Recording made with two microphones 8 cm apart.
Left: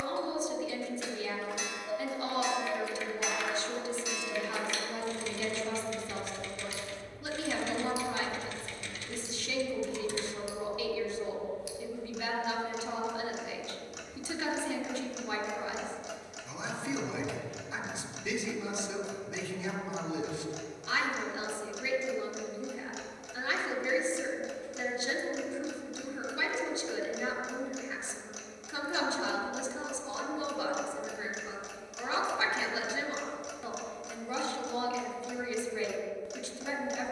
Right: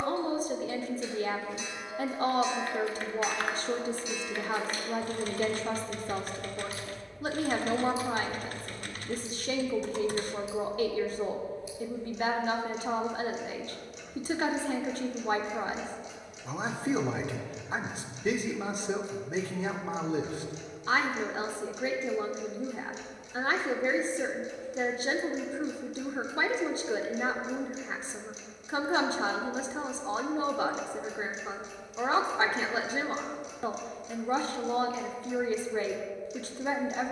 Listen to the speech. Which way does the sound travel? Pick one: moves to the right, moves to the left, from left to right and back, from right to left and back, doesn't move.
doesn't move.